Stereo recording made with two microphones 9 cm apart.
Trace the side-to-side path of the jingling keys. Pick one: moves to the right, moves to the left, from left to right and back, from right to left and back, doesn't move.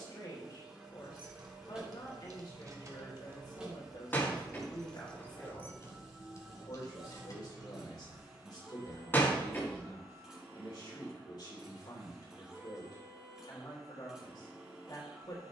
moves to the left.